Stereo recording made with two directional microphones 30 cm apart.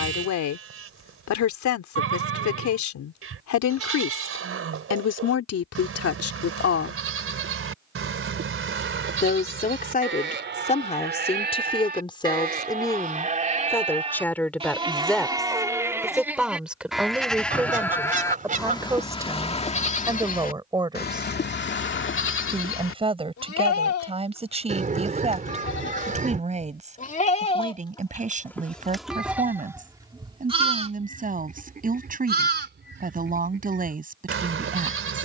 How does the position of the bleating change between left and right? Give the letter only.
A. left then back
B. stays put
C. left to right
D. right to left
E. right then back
A.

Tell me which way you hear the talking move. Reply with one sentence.
In this clip you hear the talking move from left to right.